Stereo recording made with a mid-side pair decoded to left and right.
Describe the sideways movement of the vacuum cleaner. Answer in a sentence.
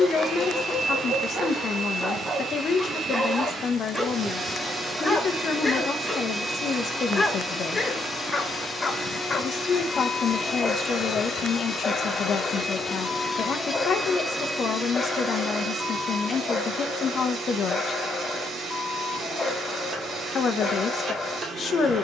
In this clip you hear the vacuum cleaner move from right to left and back again.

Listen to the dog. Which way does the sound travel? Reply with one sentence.
In this clip you hear the dog travel towards the left.